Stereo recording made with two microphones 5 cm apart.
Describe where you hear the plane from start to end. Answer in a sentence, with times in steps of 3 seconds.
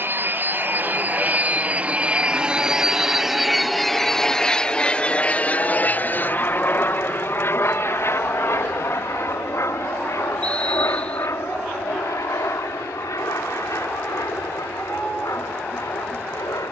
You can hear the plane on the right from 0 s, in the centre from 3 s and on the left from 6 s.